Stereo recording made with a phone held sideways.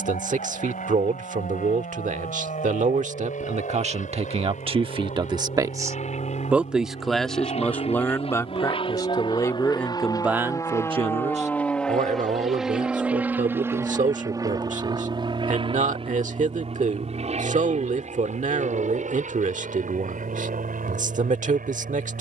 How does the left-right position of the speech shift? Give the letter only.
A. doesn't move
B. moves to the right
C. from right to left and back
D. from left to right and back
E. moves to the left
C.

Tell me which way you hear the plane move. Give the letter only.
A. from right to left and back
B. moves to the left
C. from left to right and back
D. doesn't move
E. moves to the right
E.